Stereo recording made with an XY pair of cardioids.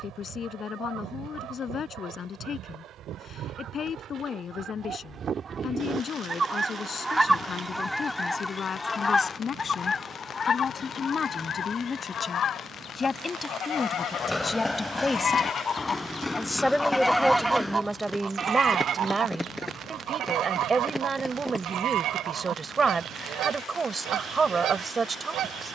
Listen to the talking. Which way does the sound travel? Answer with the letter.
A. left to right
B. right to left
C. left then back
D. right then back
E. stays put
A.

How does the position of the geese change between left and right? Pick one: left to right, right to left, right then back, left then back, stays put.
left then back.